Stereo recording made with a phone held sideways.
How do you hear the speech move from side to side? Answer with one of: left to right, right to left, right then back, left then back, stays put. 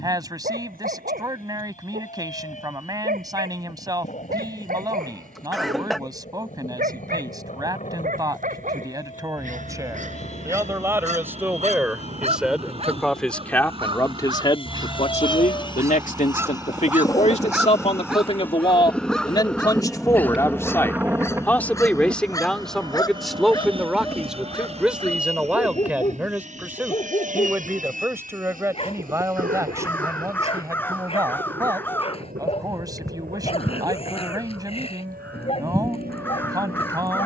left then back.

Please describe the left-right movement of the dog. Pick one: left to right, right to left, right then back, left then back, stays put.
right to left.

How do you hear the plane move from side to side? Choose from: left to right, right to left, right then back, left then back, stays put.
left to right.